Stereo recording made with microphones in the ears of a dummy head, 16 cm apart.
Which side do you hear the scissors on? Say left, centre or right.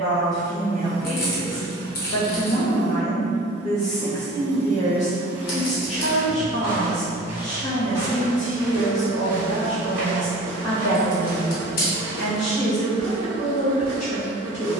left.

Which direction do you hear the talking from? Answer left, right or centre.
left.